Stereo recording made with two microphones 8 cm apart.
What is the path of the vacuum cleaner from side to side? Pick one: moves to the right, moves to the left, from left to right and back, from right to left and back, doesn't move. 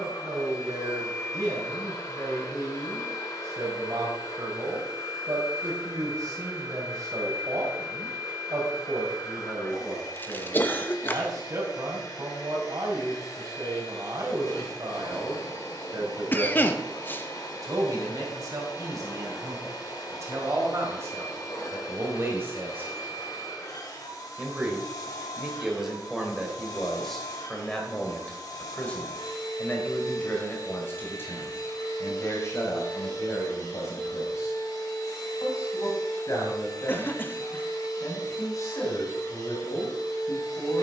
doesn't move.